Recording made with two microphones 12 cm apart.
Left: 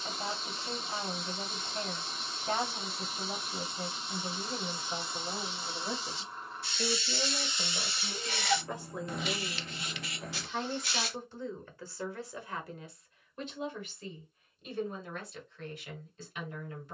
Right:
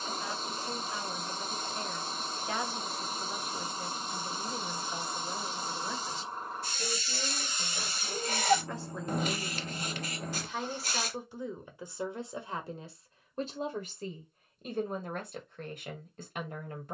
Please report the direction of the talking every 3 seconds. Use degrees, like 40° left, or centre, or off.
40° left, 40° left, 30° left, centre, 40° right, 50° right.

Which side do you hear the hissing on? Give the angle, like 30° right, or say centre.
40° right.